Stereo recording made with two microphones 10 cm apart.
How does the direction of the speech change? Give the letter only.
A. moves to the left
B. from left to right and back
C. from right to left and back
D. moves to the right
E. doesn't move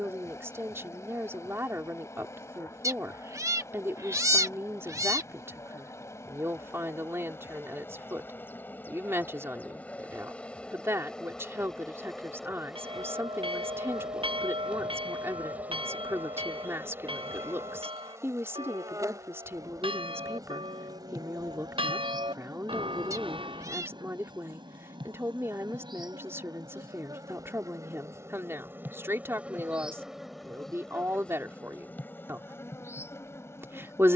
E.